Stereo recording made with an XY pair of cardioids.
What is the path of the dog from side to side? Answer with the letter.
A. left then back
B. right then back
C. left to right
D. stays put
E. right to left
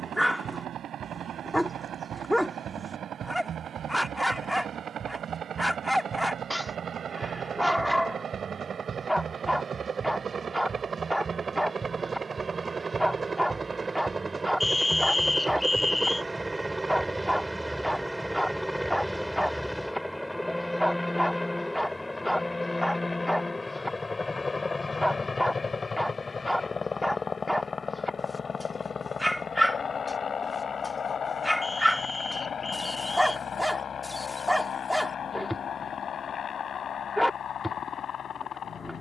D.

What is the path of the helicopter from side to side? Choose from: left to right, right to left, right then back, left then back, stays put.
right to left.